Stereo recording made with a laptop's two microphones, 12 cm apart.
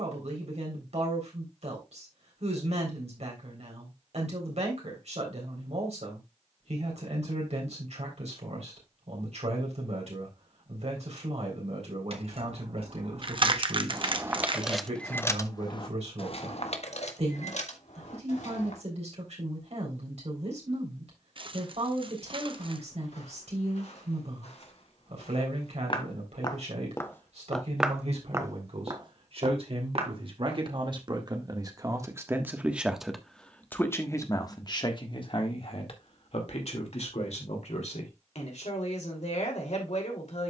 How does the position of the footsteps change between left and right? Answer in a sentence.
In this clip you hear the footsteps move from left to right.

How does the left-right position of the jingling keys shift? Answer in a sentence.
In this clip you hear the jingling keys go from the right side to the left.